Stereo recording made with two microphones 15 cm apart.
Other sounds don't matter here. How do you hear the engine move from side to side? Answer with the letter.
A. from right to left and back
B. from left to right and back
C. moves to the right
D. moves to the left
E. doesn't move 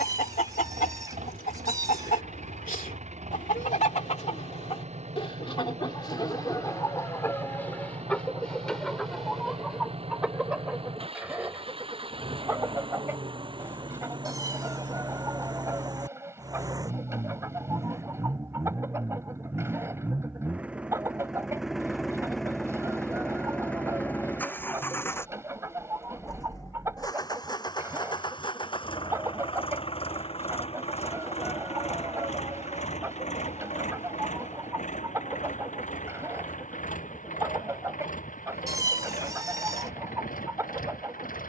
D.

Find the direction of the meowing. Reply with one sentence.
In this clip you hear the meowing on the right.